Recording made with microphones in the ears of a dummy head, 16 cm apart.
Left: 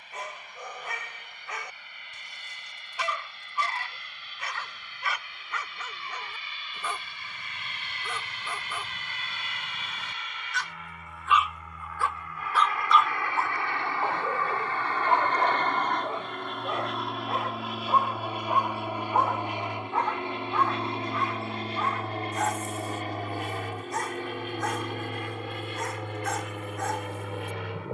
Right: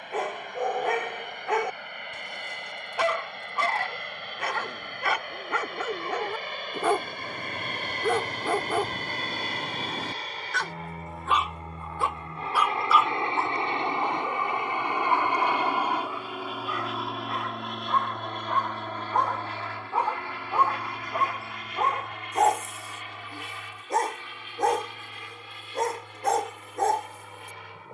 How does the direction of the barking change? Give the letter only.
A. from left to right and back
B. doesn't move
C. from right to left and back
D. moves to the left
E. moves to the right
C.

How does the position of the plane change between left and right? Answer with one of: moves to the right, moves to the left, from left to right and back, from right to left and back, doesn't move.
moves to the left.